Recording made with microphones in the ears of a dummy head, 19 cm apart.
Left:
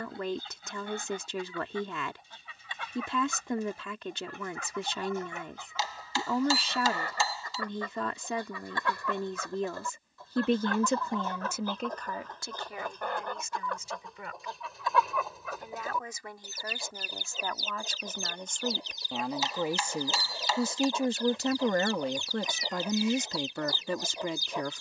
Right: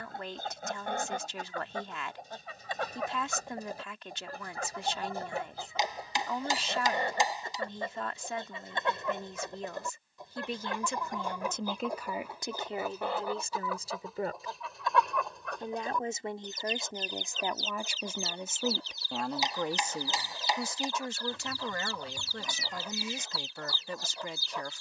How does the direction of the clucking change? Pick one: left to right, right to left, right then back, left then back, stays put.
right to left.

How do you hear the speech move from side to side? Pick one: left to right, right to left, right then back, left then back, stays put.
right then back.